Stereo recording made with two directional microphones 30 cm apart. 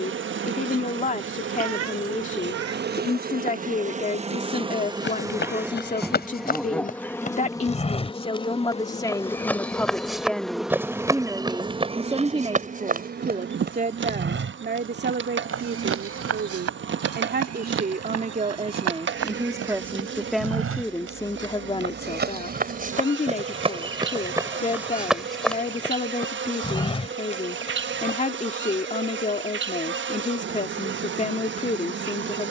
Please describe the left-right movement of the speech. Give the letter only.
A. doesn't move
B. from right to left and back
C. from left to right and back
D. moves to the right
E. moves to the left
C.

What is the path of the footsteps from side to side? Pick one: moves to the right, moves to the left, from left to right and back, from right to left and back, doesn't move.
from left to right and back.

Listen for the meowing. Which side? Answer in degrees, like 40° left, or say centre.
60° right.